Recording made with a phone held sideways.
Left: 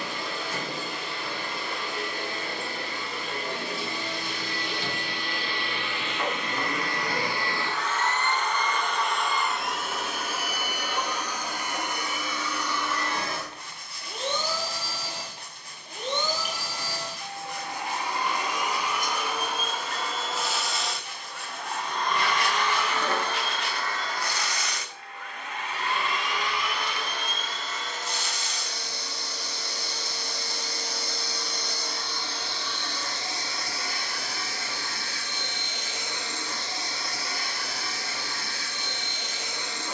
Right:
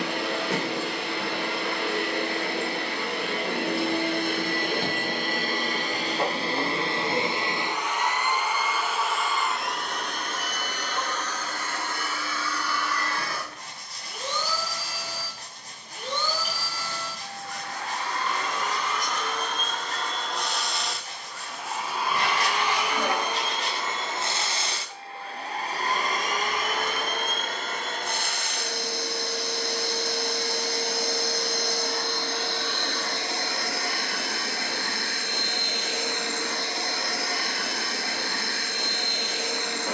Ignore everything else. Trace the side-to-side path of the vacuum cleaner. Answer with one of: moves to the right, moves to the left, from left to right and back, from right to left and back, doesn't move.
from right to left and back.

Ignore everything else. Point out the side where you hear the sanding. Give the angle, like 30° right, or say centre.
40° right.